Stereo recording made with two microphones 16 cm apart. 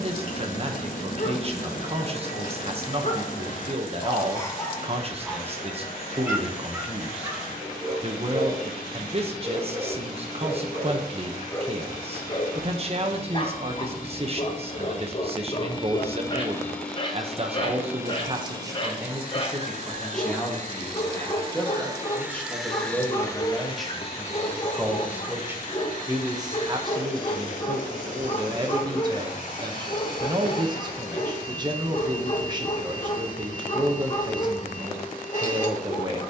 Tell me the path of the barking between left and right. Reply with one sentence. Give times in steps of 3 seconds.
In this clip you hear the barking on the left from 0 s, on the right from 6 s, in the centre from 9 s and on the left from 12 s.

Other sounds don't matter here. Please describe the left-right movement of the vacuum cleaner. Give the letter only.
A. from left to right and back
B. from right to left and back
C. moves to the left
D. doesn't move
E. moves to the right
A.